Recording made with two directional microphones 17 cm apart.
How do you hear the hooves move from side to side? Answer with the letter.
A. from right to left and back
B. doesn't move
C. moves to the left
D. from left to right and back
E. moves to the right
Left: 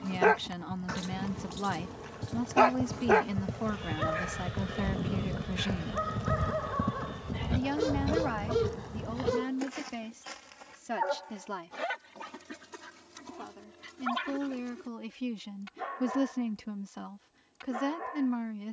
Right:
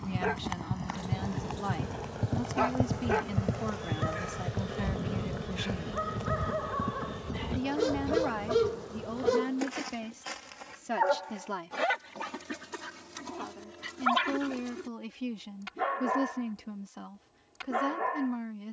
C.